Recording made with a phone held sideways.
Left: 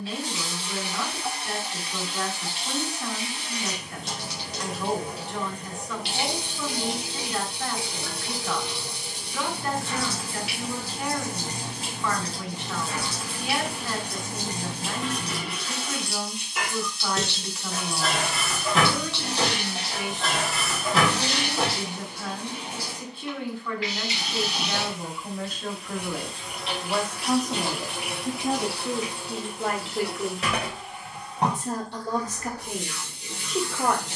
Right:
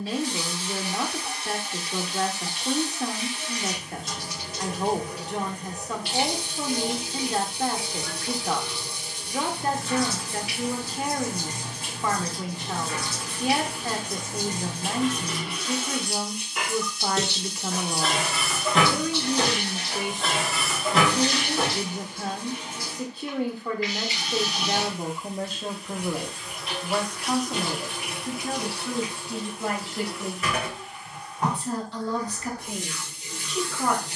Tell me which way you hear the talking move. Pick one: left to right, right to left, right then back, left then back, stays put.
right to left.